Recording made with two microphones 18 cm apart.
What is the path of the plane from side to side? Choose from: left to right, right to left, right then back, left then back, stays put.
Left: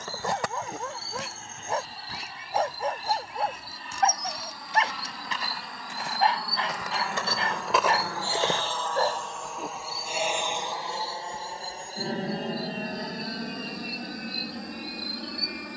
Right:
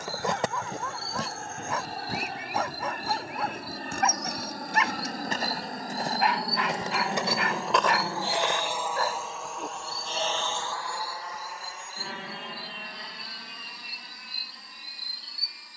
right to left.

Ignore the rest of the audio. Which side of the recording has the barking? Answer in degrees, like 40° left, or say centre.
30° left.